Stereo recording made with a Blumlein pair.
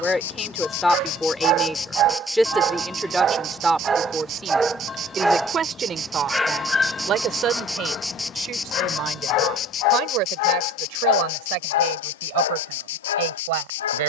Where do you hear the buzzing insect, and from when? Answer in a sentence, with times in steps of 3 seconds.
You can hear the buzzing insect on the left from 0 s, on the right from 3 s, in the centre from 6 s and on the left from 9 s.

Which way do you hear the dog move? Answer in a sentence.
In this clip you hear the dog move to the left.